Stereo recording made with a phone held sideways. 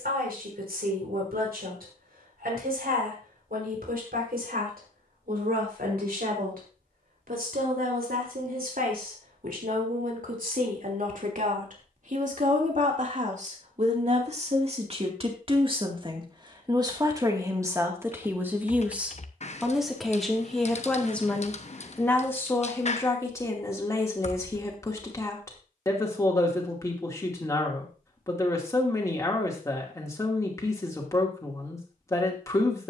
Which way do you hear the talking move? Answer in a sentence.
In this clip you hear the talking travel towards the left.